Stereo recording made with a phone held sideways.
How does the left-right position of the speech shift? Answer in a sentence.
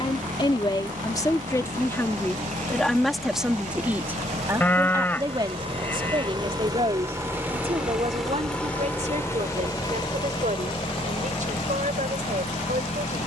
In this clip you hear the speech travel towards the right.